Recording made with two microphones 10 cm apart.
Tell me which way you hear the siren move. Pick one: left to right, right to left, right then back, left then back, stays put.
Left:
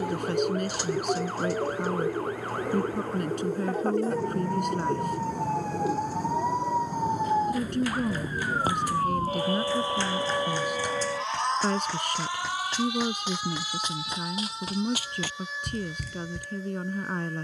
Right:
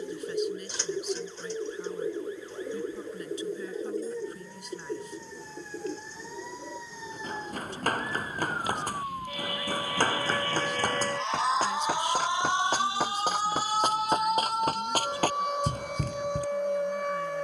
left to right.